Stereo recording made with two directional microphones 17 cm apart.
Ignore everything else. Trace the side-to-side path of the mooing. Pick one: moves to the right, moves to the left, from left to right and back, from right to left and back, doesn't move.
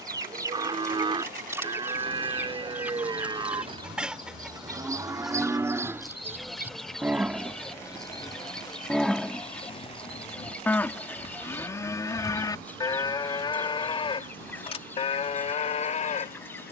moves to the left.